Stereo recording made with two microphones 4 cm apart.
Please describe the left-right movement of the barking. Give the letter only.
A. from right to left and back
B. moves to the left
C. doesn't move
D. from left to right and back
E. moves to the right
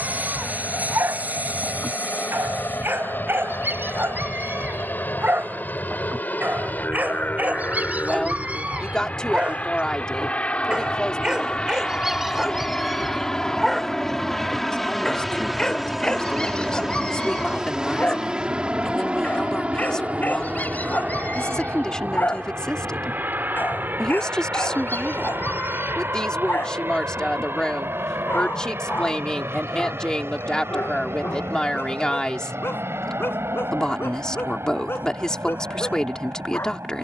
B.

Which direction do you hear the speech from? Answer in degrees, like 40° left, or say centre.
20° left.